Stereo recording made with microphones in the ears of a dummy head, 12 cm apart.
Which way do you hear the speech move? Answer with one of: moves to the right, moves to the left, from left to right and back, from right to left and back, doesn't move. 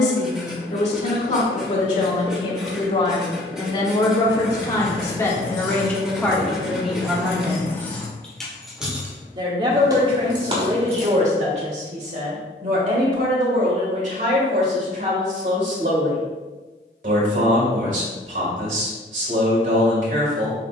moves to the right.